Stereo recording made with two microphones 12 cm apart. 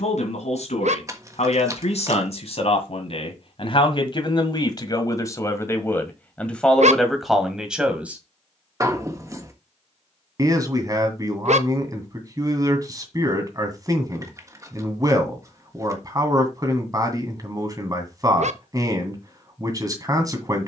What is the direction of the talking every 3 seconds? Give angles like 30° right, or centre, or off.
60° left, 40° left, centre, 30° right, 30° right, 30° right, 30° right.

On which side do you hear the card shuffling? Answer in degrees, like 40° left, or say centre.
30° right.